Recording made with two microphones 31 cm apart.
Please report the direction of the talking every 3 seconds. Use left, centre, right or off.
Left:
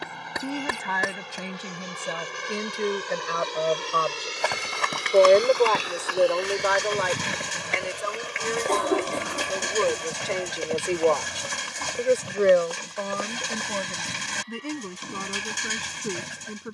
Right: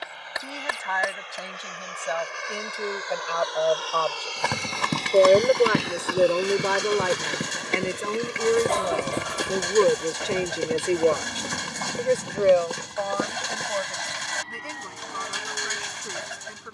left, centre, right, right, left, left.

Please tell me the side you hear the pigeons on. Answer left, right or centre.
left.